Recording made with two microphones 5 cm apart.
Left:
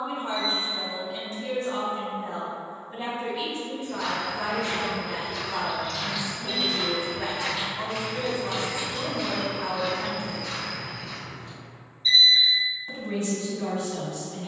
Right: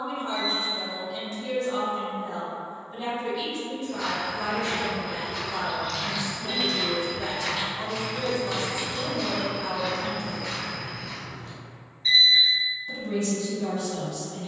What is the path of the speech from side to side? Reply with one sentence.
You can hear the speech stay put.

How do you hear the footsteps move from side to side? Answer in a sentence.
In this clip you hear the footsteps move from right to left and back again.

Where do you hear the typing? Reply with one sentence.
You can hear the typing on the right.